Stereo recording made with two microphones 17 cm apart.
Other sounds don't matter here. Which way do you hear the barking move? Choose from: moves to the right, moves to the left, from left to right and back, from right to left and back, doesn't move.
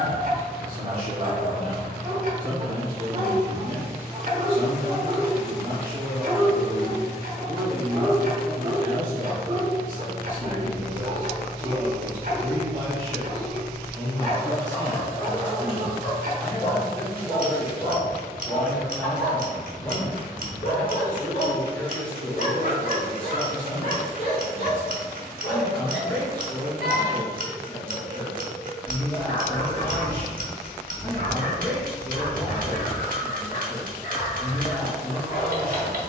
moves to the left.